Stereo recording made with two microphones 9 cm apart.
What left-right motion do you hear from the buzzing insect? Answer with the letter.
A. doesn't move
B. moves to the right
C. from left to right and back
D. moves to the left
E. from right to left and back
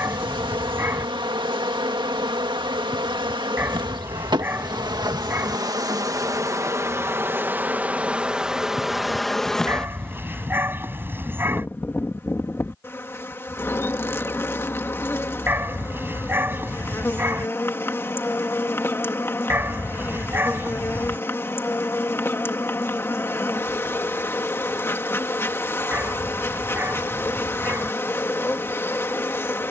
D.